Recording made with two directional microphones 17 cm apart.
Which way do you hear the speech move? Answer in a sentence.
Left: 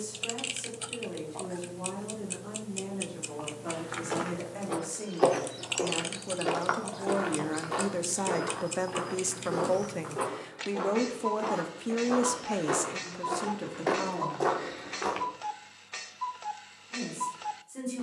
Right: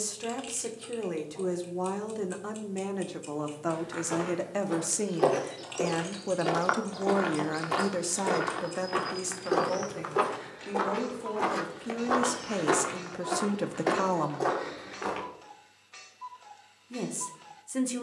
In this clip you hear the speech move from right to left and back again.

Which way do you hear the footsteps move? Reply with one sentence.
In this clip you hear the footsteps go right and come back.